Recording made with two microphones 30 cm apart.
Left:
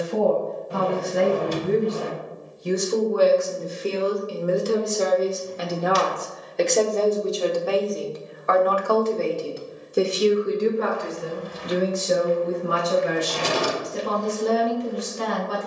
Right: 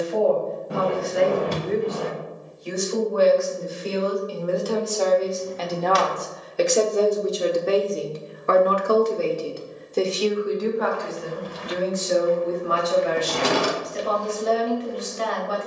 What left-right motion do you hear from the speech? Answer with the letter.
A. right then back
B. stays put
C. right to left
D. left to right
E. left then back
A.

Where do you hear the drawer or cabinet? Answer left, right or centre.
right.